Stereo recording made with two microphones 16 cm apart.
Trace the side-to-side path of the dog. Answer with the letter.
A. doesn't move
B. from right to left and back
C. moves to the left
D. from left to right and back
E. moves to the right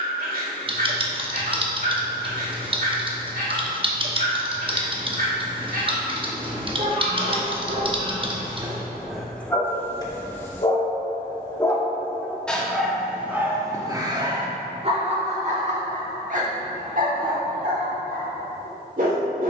B.